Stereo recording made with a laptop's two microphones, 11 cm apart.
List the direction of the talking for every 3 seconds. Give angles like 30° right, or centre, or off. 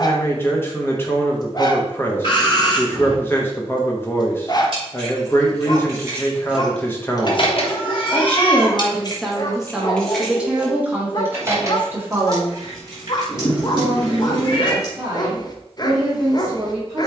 20° left, 20° left, 20° left, 10° right, 20° right, 30° right.